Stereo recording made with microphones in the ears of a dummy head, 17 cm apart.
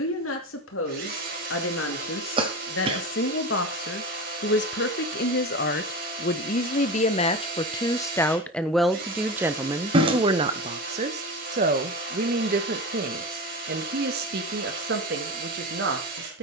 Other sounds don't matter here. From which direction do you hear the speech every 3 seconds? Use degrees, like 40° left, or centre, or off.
80° left, 60° left, 30° left, 30° right, 50° right, 60° right.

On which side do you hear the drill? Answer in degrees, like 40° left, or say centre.
50° right.